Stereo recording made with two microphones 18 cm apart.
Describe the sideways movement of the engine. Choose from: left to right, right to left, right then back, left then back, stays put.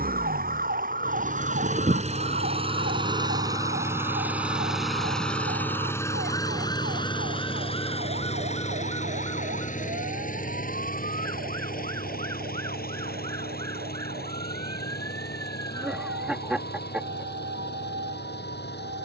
right to left.